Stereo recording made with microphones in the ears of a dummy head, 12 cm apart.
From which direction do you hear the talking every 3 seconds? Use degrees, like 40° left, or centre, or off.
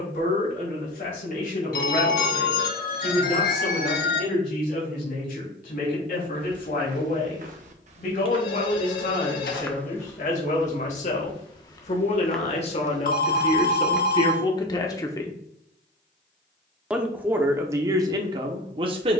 70° left, 70° left, 70° left, 60° left, 40° left, 10° right, 40° right.